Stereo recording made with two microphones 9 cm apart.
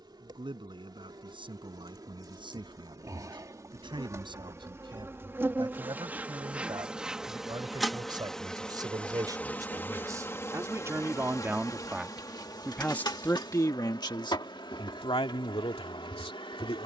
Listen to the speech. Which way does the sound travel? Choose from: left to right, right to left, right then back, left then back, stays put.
right to left.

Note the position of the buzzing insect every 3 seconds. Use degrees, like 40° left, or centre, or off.
50° right, 30° right, centre, 30° left, 50° left, 60° left.